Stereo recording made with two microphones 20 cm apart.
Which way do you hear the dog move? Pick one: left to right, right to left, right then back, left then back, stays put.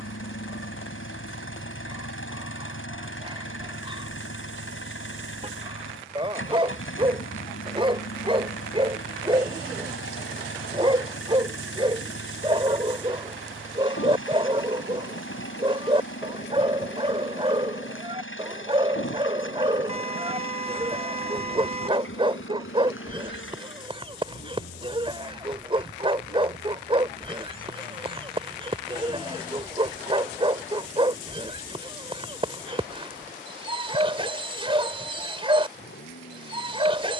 stays put.